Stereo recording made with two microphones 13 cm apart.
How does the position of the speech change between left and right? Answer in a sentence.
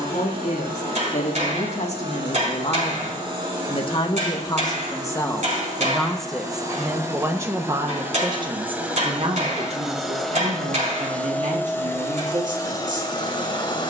You can hear the speech move from left to right.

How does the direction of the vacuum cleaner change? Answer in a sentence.
You can hear the vacuum cleaner travel towards the left.